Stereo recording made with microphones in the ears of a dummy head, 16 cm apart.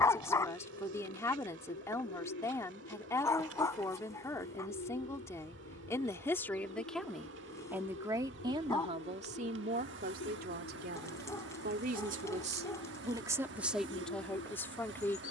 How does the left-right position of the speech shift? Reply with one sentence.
You can hear the speech go right and come back.